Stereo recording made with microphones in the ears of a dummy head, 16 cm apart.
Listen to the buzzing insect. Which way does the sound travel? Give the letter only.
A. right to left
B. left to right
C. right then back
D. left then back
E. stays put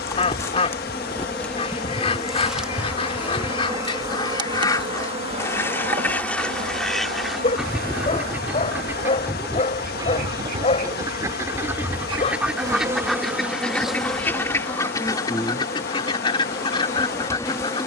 C.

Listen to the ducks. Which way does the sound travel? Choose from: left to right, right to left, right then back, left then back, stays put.
right then back.